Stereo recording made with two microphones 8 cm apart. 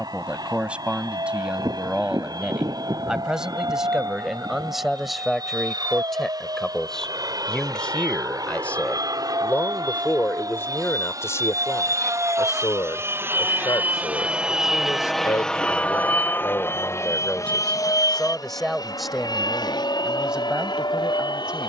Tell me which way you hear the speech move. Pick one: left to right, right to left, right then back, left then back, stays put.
left then back.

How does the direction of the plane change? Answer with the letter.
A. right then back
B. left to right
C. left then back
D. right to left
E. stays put
D.